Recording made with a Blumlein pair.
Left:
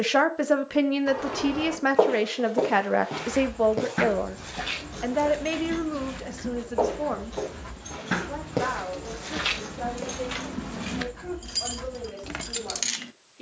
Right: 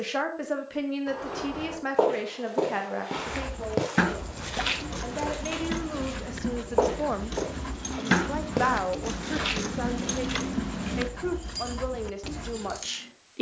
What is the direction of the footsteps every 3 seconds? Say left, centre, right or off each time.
centre, right, centre, centre, off.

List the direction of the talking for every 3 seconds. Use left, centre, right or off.
left, left, centre, right, right.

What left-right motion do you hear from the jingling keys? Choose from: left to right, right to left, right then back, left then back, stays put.
right to left.